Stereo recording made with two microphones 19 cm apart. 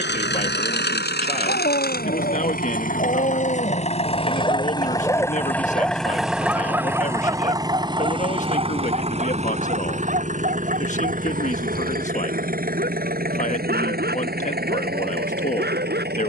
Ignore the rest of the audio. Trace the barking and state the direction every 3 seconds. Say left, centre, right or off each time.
left, left, right, right, right, right.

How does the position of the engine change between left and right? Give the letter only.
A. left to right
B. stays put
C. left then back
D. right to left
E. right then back
A.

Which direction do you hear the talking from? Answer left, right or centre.
left.